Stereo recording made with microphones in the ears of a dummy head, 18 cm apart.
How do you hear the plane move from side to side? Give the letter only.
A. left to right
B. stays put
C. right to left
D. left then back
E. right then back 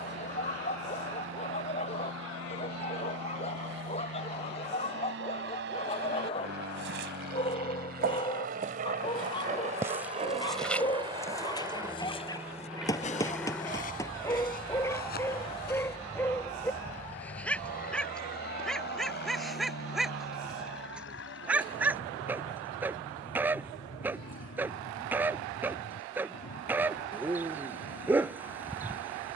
C.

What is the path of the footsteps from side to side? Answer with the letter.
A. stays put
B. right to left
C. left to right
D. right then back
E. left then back
B.